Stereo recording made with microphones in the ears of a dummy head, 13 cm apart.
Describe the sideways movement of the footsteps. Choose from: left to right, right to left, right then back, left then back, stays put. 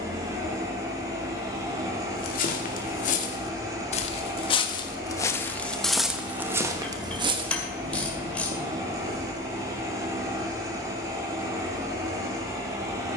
left to right.